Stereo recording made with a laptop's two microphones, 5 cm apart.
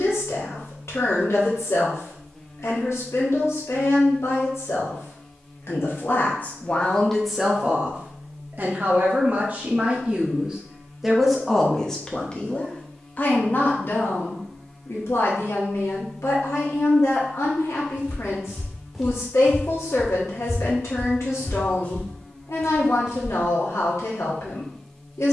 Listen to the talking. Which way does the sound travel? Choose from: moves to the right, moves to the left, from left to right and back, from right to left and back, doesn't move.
from left to right and back.